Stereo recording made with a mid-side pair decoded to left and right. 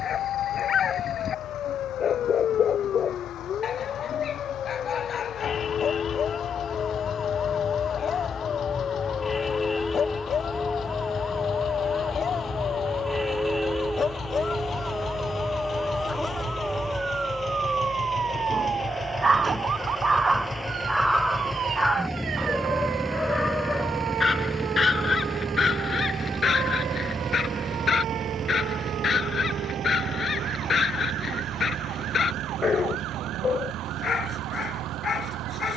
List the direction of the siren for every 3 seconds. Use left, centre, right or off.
left, left, left, centre, centre, right, right, right, right, right, right, right.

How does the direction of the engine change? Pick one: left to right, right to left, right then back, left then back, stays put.
left to right.